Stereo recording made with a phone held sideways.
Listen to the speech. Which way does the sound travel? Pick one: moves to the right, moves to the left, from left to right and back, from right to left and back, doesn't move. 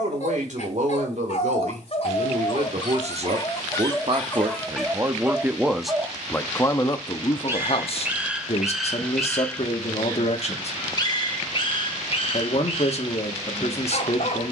moves to the left.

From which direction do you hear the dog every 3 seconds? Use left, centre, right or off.
left, centre, centre, left, left.